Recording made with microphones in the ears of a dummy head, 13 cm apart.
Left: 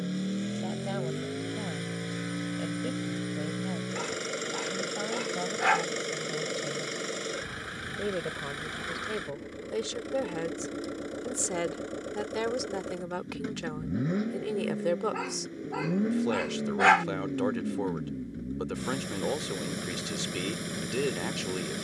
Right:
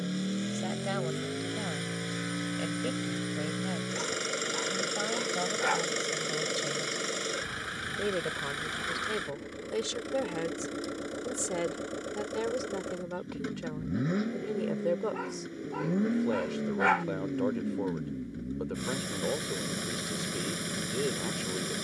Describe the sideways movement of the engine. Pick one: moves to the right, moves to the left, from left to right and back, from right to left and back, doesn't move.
doesn't move.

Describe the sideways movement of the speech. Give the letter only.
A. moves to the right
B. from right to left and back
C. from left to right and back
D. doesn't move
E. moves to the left
E.